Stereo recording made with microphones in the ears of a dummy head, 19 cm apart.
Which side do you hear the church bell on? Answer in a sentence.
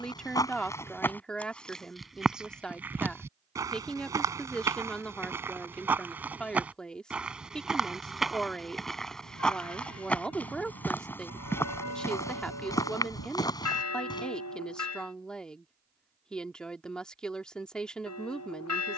You can hear the church bell on the left.